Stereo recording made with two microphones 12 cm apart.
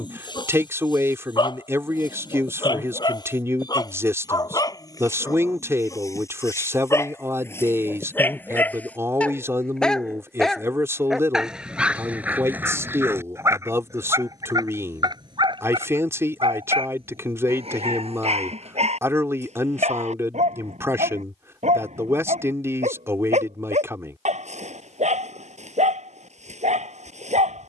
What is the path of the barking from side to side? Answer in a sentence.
You can hear the barking move to the right.